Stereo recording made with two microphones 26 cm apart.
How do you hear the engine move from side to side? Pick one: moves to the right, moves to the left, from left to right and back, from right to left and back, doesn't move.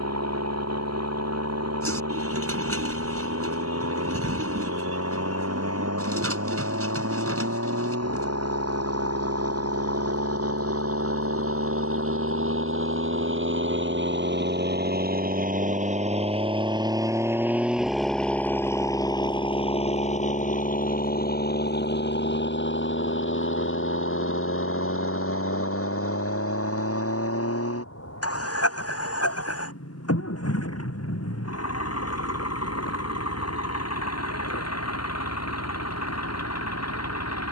moves to the left.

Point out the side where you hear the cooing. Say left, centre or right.
right.